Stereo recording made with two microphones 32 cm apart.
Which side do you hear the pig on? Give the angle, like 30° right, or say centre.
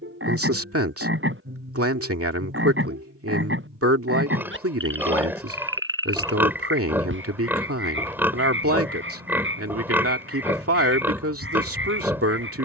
10° right.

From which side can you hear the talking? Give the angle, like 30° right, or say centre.
40° right.